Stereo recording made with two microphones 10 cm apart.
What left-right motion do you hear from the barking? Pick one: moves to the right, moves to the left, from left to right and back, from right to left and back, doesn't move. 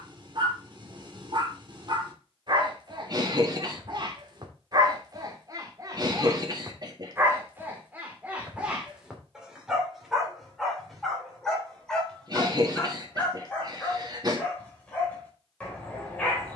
moves to the left.